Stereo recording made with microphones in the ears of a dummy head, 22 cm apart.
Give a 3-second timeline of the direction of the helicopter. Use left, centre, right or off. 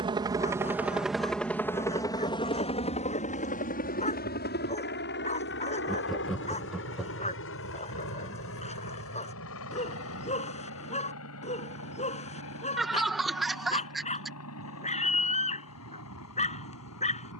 centre, left, left, left, left, left.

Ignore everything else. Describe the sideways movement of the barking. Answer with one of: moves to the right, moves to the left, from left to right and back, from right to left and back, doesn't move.
doesn't move.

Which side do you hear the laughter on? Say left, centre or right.
centre.